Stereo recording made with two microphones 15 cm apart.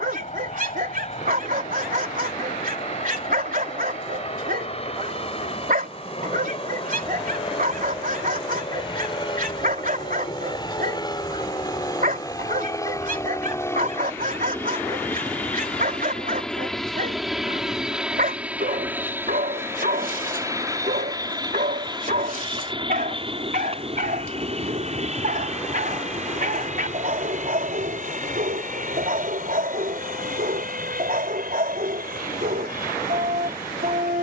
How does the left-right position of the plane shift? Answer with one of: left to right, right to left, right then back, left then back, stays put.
left to right.